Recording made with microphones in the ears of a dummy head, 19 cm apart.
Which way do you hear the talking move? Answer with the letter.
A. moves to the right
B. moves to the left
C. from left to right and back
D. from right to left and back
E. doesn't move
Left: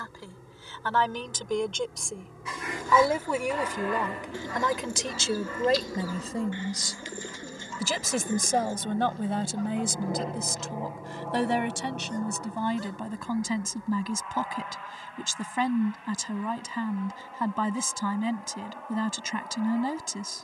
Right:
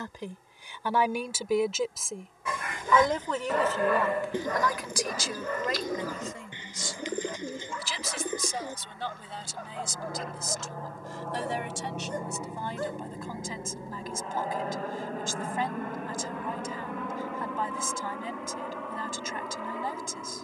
B.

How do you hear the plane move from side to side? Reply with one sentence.
In this clip you hear the plane move to the right.